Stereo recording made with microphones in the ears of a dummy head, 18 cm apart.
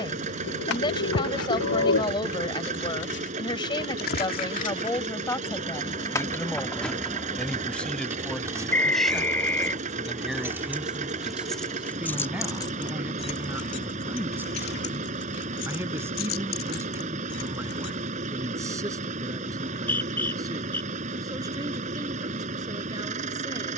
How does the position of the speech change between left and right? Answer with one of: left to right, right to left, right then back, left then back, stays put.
left to right.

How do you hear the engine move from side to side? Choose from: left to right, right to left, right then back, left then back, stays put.
stays put.